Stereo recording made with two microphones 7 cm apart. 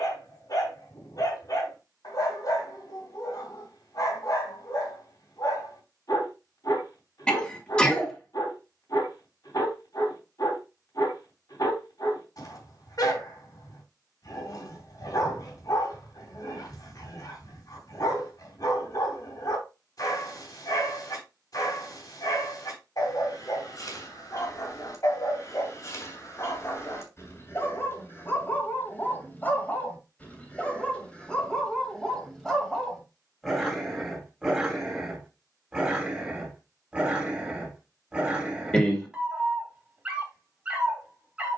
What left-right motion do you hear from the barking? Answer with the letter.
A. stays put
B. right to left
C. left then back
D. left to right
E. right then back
D.